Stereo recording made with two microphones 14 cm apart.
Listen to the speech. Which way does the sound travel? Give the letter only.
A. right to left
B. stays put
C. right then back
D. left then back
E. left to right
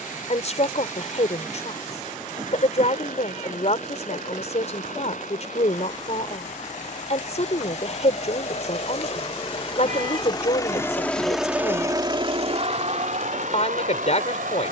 B.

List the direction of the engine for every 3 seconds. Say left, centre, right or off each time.
left, left, left, left, right.